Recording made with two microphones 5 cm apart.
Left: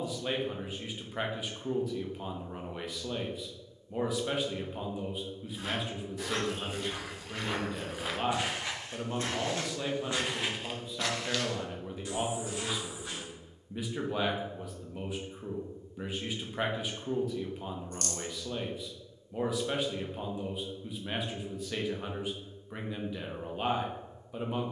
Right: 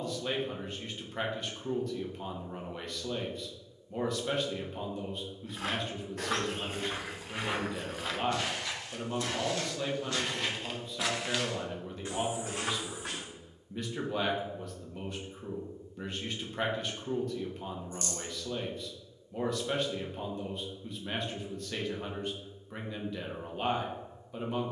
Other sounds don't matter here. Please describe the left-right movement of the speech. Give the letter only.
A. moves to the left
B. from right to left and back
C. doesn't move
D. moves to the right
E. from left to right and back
C.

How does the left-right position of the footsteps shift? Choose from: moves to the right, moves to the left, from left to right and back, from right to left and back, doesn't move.
from right to left and back.